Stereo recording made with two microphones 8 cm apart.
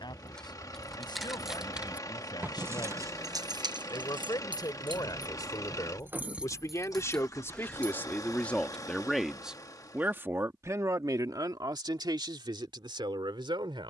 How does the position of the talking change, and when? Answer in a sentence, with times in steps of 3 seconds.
You can hear the talking on the left from 0 s and on the right from 9 s.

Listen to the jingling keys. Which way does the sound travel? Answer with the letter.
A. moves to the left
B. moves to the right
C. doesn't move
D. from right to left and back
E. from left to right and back
E.